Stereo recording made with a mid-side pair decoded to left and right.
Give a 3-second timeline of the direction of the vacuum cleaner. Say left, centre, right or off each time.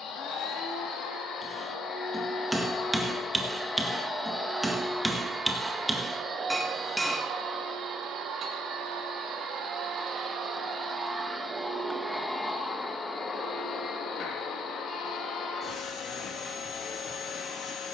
left, centre, right, right, left, left.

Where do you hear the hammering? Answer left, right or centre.
centre.